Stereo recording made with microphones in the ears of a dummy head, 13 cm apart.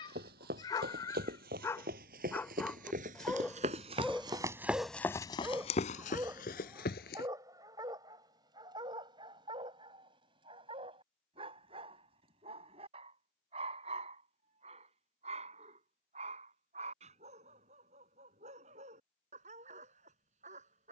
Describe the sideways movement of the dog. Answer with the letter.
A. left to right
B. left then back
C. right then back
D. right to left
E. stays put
A.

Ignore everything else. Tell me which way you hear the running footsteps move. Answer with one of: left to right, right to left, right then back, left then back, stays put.
right to left.